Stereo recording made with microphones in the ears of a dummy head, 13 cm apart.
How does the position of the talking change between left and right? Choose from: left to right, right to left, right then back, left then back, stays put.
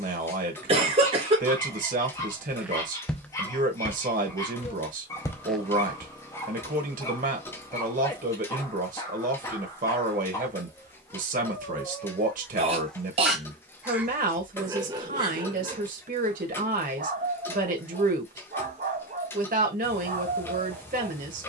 stays put.